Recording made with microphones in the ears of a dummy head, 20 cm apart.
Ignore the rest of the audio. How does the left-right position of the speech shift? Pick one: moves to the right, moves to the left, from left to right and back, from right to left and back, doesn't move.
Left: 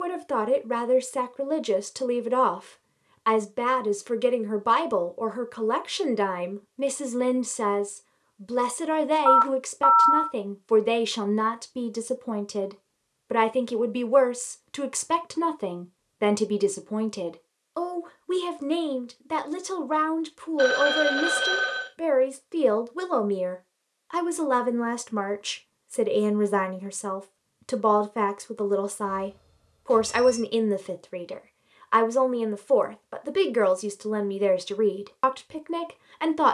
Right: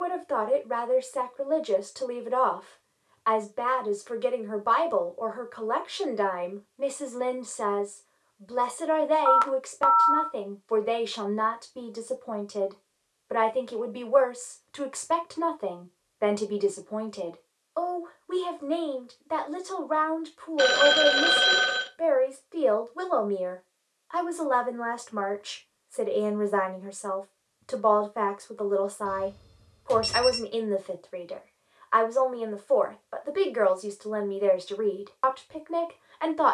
doesn't move.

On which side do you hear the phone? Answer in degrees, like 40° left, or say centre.
40° right.